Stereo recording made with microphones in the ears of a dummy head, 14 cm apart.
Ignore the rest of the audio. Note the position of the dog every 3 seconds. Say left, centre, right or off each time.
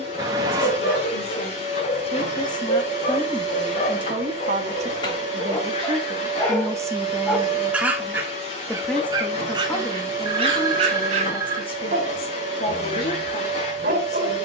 left, left, centre, right, right.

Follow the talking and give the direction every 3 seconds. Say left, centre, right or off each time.
left, right, centre, left, left.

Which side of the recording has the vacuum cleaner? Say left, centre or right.
left.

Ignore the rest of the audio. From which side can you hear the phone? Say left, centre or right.
right.